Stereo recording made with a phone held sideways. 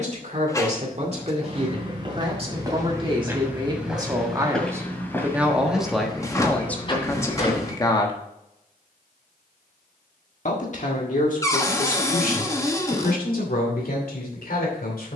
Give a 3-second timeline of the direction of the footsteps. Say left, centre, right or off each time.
right, centre, left, off, off.